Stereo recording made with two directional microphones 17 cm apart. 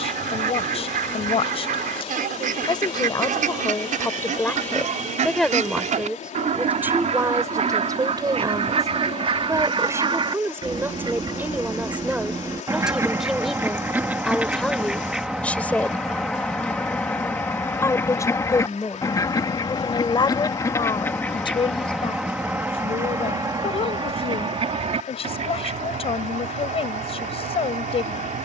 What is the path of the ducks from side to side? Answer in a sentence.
You can hear the ducks move from right to left and back again.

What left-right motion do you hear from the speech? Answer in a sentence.
In this clip you hear the speech go right and come back.